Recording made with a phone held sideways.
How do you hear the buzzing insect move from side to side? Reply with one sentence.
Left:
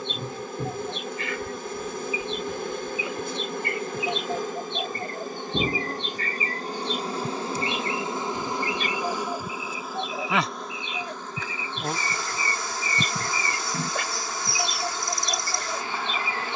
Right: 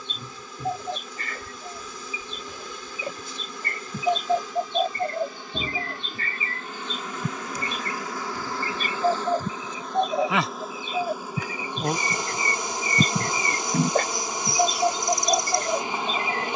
In this clip you hear the buzzing insect go from the left side to the right.